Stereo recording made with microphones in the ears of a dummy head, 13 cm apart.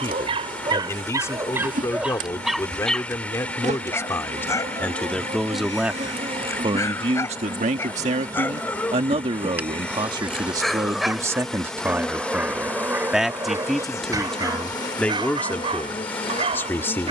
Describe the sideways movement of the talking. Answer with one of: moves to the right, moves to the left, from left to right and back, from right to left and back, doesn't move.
from left to right and back.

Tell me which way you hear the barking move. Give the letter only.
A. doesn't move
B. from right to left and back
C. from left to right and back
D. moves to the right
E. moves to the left
B.